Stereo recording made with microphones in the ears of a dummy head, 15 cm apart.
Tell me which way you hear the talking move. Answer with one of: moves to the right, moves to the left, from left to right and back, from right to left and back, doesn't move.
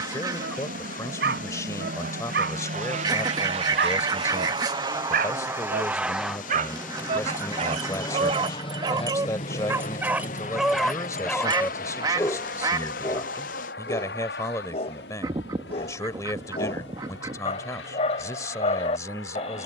doesn't move.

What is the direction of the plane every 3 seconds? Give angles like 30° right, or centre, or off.
60° right, 30° right, 10° left, 40° left, 60° left, 70° left, 70° left.